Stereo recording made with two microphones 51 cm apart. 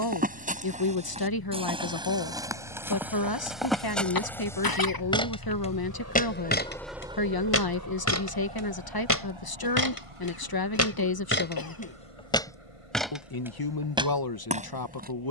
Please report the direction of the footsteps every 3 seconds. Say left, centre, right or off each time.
centre, centre, left, left, centre.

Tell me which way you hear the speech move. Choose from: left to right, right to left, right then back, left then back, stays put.
stays put.